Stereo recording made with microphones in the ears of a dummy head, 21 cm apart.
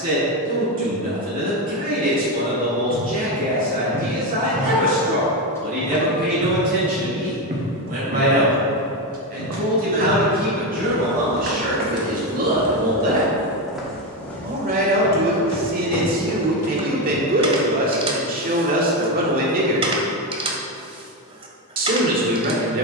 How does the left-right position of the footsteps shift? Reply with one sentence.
In this clip you hear the footsteps move from left to right and back again.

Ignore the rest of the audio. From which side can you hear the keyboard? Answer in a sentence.
You can hear the keyboard on the right.